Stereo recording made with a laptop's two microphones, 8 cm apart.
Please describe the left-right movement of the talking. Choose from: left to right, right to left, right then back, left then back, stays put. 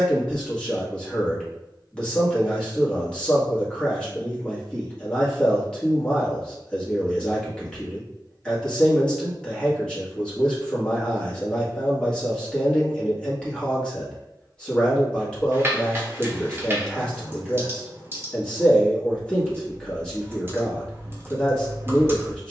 stays put.